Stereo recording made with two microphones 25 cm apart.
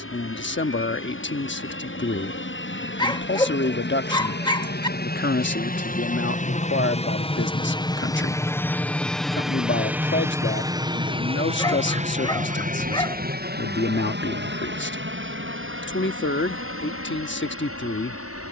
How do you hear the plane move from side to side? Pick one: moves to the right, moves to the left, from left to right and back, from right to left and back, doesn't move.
moves to the right.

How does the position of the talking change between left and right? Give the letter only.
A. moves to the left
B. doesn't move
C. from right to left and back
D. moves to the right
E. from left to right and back
B.